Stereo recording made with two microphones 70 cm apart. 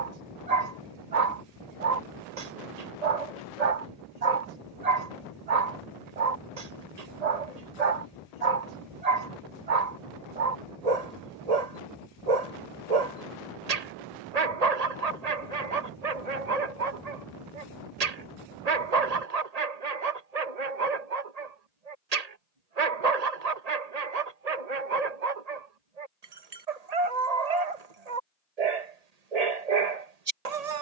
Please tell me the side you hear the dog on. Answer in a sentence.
In this clip you hear the dog on the right.